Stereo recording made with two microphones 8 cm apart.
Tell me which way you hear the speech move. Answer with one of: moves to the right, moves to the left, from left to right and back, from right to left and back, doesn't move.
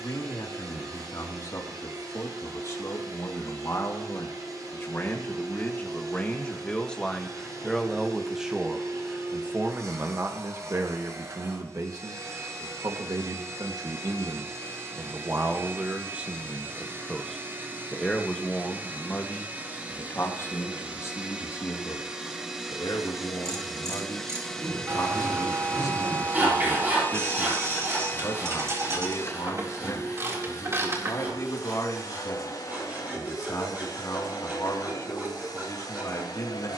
from left to right and back.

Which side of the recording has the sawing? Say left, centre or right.
right.